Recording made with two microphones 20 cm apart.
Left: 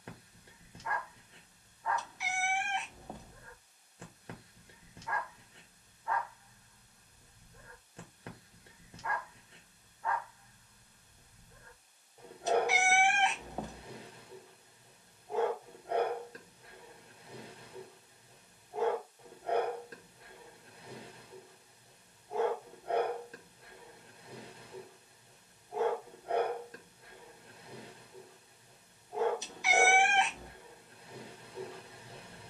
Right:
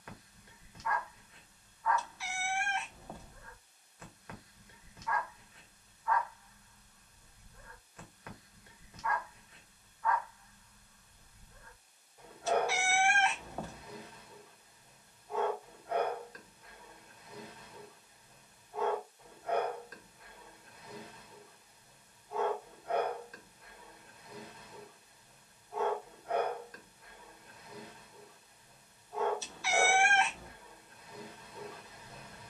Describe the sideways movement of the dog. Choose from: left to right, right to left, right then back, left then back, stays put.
stays put.